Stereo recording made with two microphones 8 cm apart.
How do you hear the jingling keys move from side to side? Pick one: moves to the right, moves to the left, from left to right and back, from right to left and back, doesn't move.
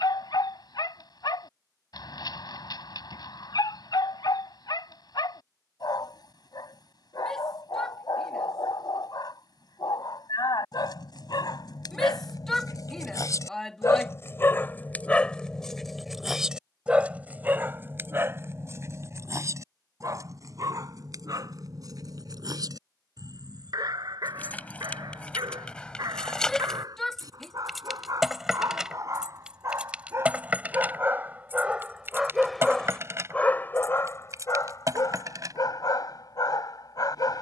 moves to the right.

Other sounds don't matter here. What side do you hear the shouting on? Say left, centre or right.
centre.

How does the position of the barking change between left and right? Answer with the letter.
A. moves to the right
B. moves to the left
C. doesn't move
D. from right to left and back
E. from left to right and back
E.